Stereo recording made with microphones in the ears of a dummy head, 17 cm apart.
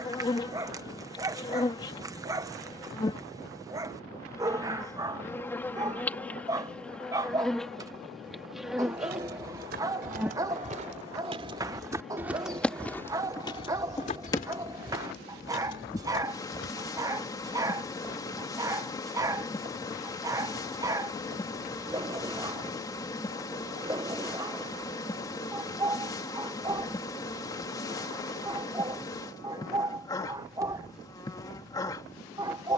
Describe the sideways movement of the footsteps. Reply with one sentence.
In this clip you hear the footsteps move from right to left.